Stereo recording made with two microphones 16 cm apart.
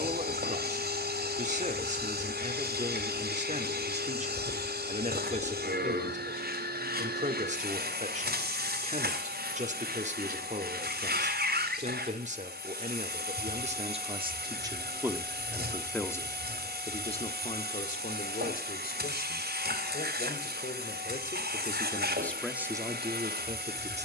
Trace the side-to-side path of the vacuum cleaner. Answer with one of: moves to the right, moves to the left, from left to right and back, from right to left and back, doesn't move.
doesn't move.